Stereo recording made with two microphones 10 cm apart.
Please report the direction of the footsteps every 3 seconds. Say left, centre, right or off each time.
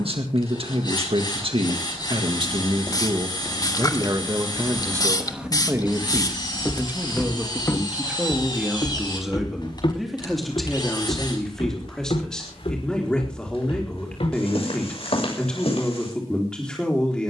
right, right, left, left, left, left.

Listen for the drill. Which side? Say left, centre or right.
left.